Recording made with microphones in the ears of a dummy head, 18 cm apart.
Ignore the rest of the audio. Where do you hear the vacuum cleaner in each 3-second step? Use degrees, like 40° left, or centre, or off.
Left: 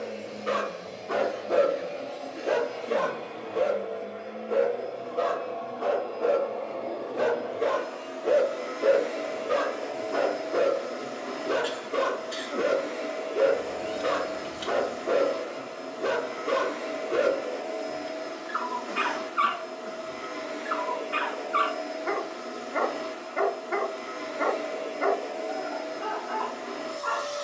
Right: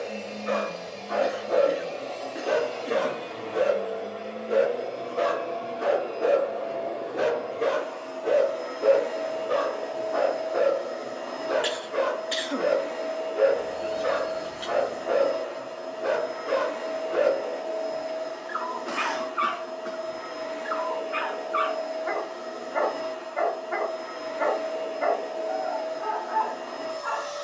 70° right, 40° right, 10° left, 30° left, 30° left, 30° left, 30° left, 30° left, 30° left.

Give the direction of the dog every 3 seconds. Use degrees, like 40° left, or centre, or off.
30° left, 20° right, centre, 40° left, 40° left, 40° left, 40° left, 40° left, 40° left.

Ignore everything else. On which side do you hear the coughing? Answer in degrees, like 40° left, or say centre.
70° right.